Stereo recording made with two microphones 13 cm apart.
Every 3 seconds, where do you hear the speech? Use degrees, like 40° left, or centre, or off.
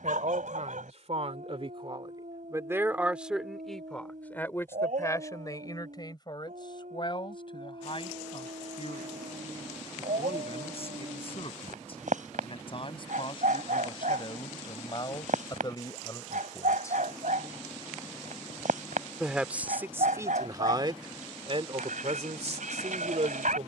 50° right, 10° left, 40° left, 50° left, 40° left, 30° left, 20° right, 50° right.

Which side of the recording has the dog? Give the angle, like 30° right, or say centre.
80° right.